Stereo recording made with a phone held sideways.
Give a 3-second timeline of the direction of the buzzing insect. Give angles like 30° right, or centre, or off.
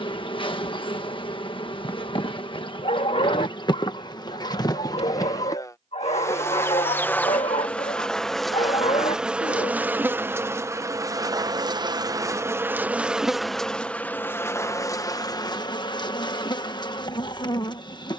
40° left, 30° left, 10° left, 20° right, centre, 30° left.